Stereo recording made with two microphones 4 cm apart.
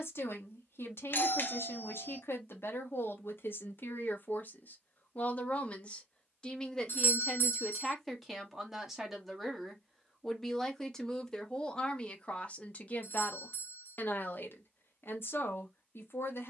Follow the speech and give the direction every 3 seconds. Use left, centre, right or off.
left, left, centre, centre, left, left.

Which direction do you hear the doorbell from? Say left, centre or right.
left.